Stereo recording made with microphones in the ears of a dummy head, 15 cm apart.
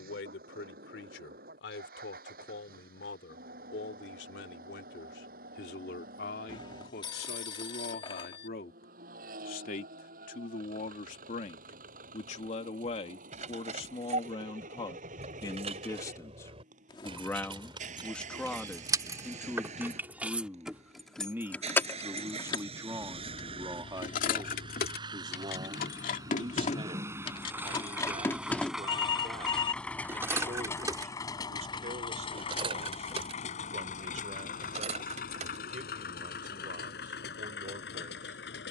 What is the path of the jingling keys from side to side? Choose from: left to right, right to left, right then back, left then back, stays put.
left then back.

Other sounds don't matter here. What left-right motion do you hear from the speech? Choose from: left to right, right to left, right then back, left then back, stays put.
left to right.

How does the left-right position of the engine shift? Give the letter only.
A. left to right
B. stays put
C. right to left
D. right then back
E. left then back
C.